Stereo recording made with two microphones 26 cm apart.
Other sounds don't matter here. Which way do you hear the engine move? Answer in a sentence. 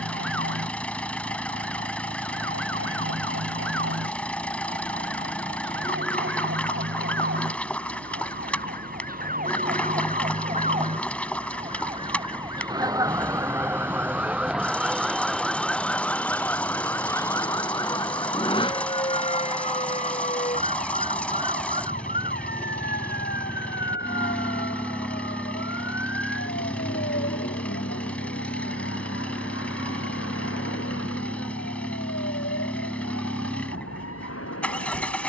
You can hear the engine stay in one place.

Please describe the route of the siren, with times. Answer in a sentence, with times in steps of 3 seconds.
You can hear the siren on the right from 0 s, in the centre from 12 s and on the left from 18 s.